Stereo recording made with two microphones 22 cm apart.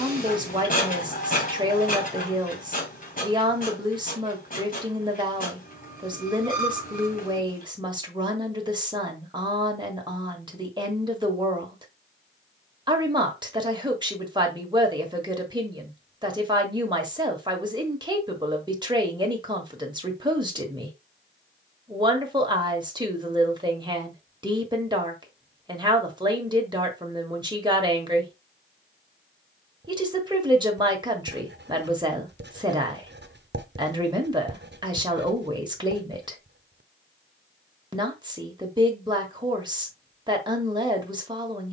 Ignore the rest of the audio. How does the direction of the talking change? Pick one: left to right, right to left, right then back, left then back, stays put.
stays put.